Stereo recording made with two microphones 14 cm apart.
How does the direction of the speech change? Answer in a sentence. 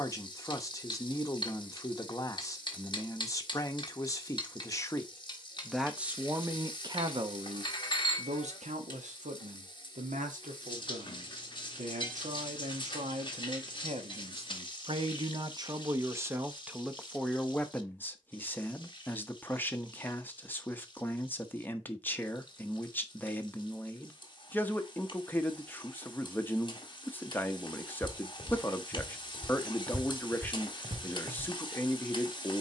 You can hear the speech move from left to right and back again.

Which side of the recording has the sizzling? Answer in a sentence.
In this clip you hear the sizzling on the left.